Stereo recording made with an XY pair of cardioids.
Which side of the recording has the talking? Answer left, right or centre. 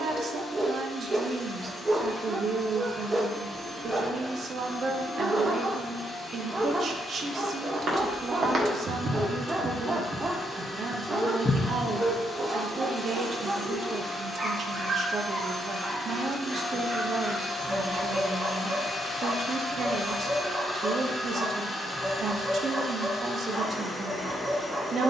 right.